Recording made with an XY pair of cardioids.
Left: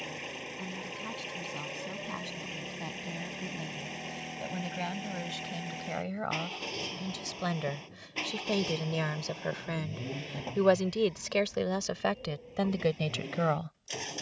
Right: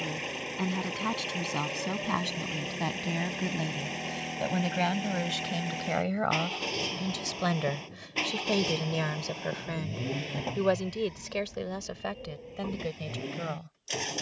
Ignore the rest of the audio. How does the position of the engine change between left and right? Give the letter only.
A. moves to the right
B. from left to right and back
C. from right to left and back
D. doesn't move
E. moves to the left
D.